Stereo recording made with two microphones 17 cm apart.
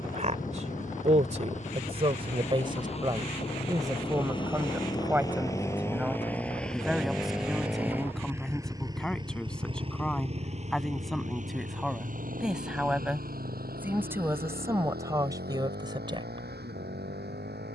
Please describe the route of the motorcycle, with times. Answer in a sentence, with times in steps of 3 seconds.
In this clip you hear the motorcycle on the left from 0 s, in the centre from 6 s and on the right from 9 s.